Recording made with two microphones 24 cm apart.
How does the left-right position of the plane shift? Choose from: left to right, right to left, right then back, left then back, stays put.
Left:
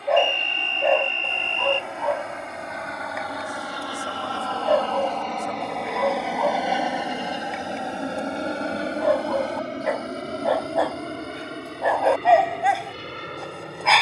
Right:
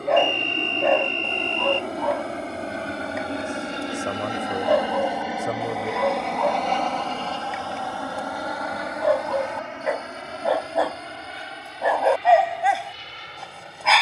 right to left.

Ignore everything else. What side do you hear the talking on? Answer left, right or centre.
right.